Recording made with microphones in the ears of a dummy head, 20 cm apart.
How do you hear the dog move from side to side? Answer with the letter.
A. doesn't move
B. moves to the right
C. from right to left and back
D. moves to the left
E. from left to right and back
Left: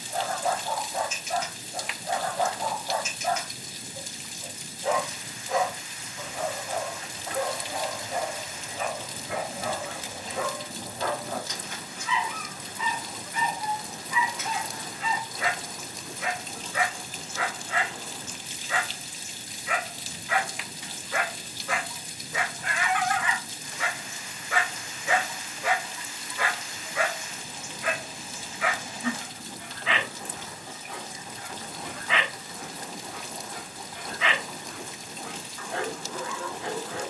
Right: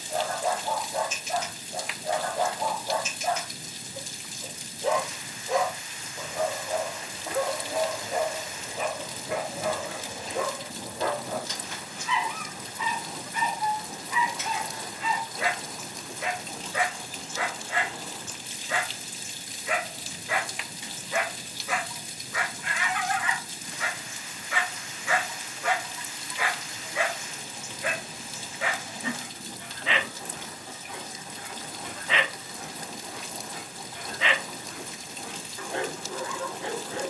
C.